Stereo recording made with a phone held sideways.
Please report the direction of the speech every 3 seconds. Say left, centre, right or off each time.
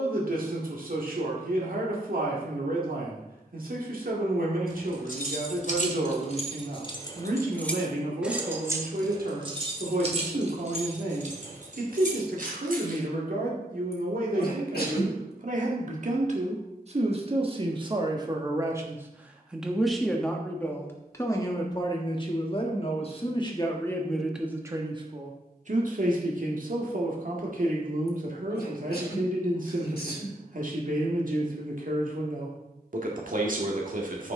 right, right, right, right, right, right, centre, left, right, right, right, right.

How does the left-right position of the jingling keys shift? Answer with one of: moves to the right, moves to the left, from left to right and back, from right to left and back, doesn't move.
moves to the right.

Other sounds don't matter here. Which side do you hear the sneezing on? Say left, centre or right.
left.